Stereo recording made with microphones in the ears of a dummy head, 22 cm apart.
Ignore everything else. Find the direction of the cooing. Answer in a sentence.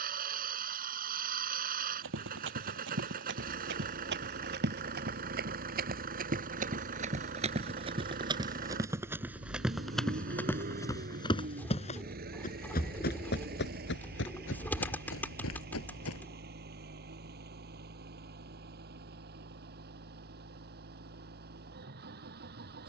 You can hear the cooing in the centre.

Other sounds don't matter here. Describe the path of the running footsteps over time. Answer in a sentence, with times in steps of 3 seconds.
In this clip you hear the running footsteps on the right from 0 s, in the centre from 9 s, on the left from 12 s and not at all from 18 s.